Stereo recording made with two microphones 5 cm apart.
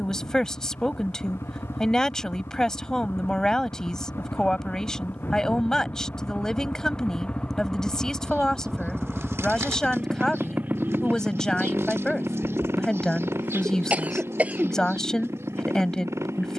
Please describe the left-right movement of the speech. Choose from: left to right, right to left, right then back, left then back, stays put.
stays put.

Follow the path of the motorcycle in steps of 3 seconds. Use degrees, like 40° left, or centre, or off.
70° left, 50° left, 20° left, 30° right, 60° right, 70° right.